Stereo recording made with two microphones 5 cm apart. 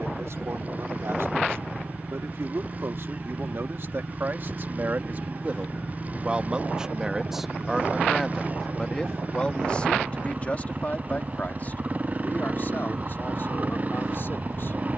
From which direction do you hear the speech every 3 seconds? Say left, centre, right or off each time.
right, right, centre, left, left.